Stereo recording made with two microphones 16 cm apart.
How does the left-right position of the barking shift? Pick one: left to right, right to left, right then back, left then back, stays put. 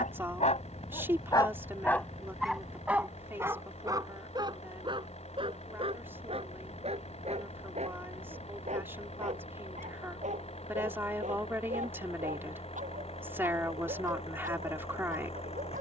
left to right.